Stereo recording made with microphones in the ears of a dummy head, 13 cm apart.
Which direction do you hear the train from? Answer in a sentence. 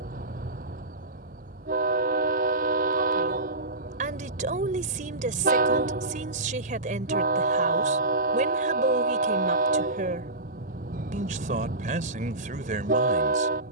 In this clip you hear the train on the right.